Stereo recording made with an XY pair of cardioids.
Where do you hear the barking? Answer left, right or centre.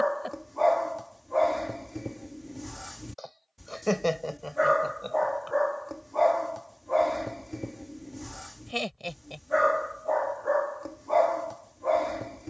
centre.